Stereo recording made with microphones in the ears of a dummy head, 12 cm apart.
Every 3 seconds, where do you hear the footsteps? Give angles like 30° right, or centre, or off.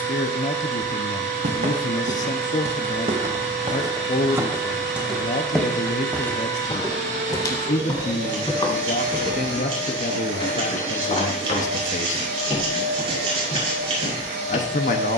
60° right, 20° right, 30° left, 40° left, 50° left.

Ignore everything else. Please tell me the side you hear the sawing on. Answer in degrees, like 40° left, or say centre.
40° right.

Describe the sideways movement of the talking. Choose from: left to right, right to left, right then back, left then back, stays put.
stays put.